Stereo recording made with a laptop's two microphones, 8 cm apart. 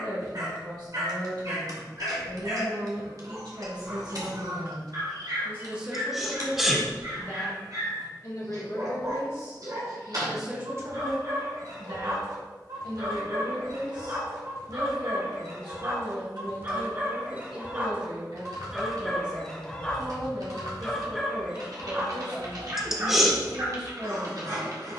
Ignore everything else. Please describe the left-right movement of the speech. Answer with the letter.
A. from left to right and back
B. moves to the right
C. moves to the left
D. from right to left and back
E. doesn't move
D.